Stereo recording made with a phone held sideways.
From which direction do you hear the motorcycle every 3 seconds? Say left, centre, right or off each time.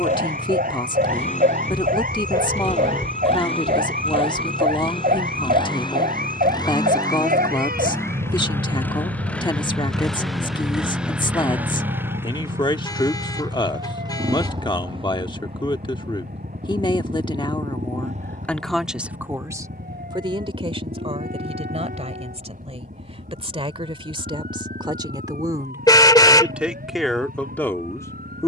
left, left, left, centre, right, right, right, right, right, right.